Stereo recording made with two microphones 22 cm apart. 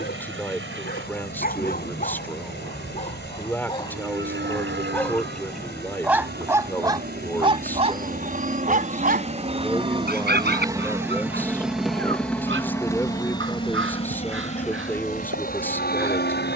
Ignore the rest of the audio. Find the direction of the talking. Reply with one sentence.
In this clip you hear the talking in the centre.